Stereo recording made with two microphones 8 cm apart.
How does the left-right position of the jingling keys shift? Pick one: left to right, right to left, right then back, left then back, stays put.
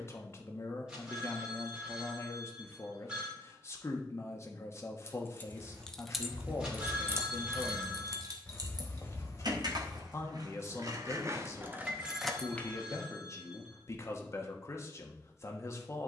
right then back.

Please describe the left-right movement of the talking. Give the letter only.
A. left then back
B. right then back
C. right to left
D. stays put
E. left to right
D.